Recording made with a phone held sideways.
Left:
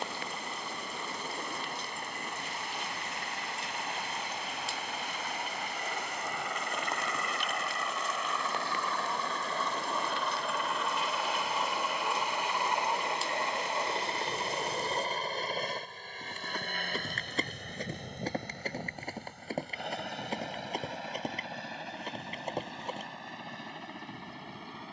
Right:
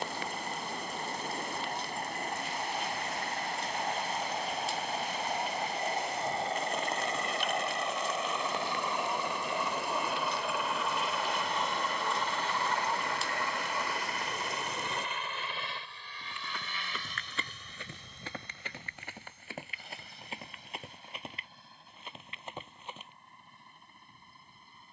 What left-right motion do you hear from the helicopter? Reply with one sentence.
You can hear the helicopter go from the right side to the left.